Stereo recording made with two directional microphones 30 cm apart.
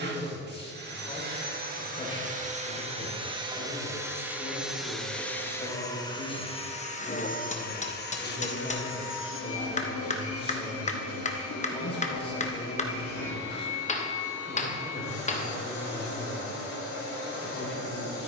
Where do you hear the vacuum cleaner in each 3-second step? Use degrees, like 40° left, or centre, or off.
30° right, centre, 30° left, 50° left, 60° left, 70° left.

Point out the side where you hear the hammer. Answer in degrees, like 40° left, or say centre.
20° left.